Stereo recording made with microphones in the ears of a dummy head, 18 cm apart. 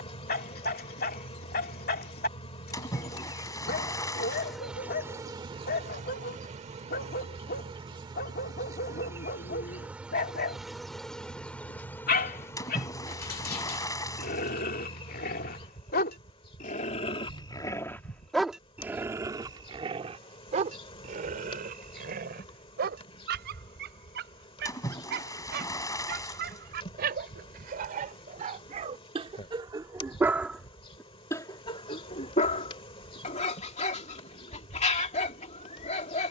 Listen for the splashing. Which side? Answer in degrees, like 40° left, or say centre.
20° left.